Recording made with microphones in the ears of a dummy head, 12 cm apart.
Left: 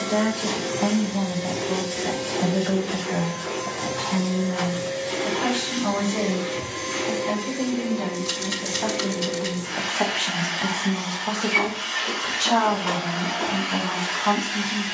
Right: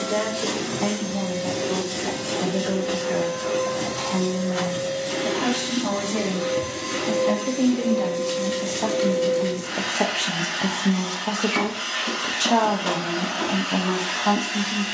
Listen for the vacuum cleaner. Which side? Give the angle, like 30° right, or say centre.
80° right.